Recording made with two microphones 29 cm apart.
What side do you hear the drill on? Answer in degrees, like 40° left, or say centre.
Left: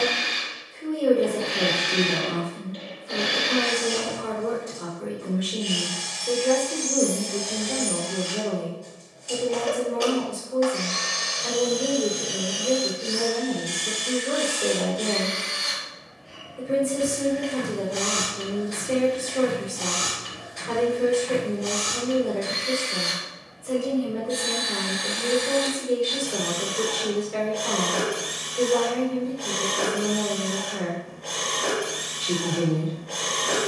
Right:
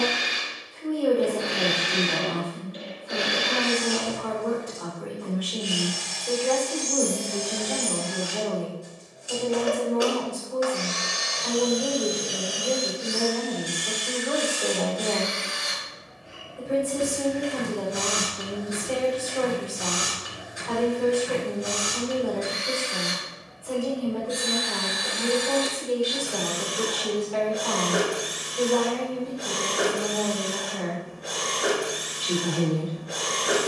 10° right.